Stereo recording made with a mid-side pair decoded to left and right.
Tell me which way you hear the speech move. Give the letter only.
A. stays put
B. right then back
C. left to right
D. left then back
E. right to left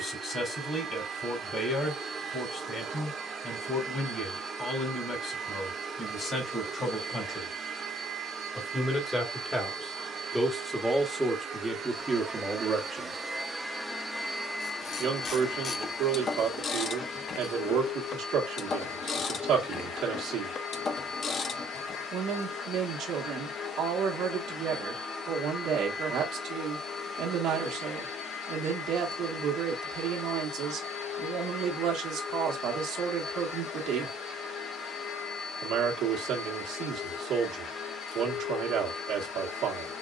C.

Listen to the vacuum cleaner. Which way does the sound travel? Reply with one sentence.
You can hear the vacuum cleaner move to the left.